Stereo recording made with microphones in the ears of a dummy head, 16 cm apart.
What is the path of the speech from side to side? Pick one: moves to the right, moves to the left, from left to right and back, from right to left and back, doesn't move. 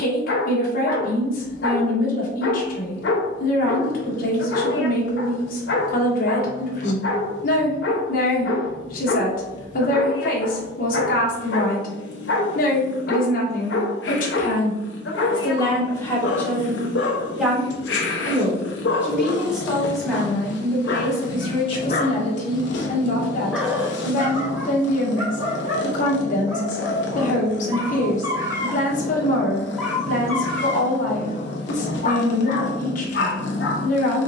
from left to right and back.